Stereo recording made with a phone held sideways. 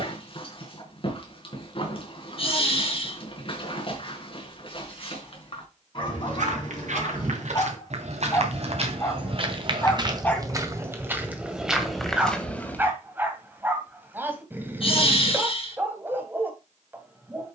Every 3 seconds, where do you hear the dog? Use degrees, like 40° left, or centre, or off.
40° left, 40° left, 40° left, 20° left, 10° right, 20° right.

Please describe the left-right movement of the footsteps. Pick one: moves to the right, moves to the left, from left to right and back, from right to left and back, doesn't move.
moves to the left.